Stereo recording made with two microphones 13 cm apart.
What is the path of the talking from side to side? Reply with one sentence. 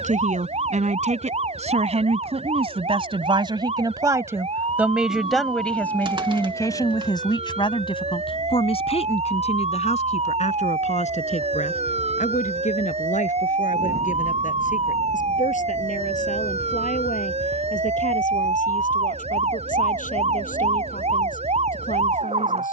In this clip you hear the talking travel towards the left.